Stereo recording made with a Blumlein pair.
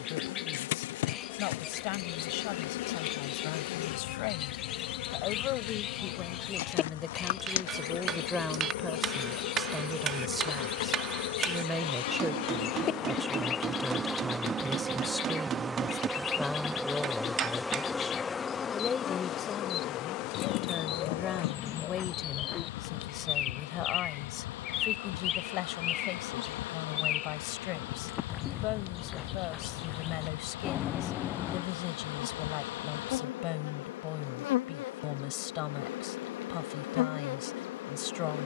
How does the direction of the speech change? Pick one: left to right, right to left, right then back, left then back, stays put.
right then back.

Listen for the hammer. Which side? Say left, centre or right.
right.